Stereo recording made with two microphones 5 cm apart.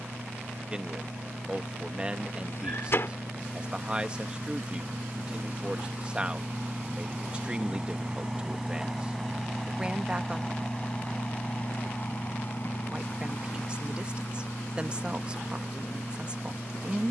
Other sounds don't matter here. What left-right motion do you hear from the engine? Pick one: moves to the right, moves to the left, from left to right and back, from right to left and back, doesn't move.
moves to the left.